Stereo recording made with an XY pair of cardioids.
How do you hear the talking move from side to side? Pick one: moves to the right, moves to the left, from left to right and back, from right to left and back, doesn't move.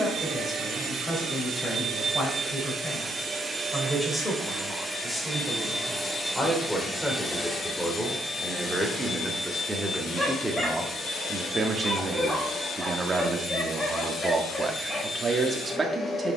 moves to the right.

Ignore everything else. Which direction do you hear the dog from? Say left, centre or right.
centre.